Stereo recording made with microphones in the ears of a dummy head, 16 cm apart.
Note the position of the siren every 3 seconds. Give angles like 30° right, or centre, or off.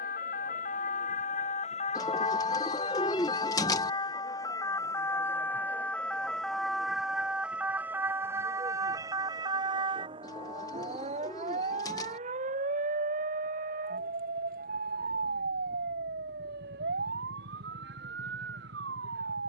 40° left, 20° left, 10° right, 30° right, 40° right, 50° right, 60° right.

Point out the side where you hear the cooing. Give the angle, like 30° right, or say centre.
20° left.